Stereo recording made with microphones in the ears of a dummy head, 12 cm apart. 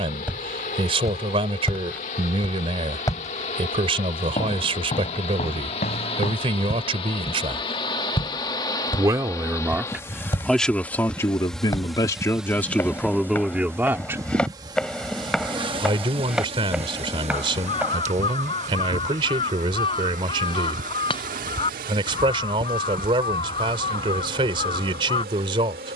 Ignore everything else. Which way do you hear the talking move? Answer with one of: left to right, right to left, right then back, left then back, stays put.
left then back.